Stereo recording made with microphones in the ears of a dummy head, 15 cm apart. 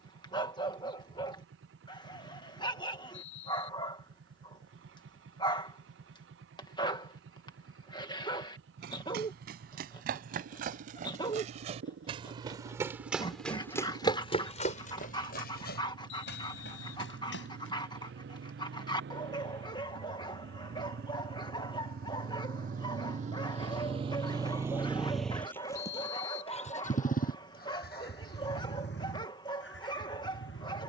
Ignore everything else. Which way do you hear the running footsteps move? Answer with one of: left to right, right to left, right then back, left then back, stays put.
right to left.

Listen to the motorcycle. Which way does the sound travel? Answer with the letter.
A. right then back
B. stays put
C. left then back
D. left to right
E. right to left
E.